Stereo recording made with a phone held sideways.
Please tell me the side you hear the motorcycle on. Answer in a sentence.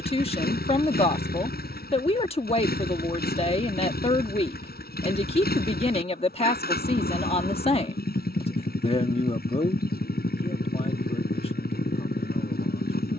In this clip you hear the motorcycle on the left.